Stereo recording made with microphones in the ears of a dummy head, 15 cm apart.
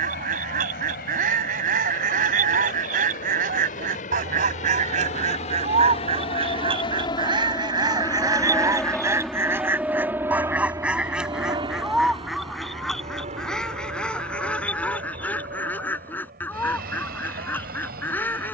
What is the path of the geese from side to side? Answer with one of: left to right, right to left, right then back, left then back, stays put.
right to left.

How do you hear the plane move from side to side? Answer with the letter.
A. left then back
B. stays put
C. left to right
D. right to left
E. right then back
C.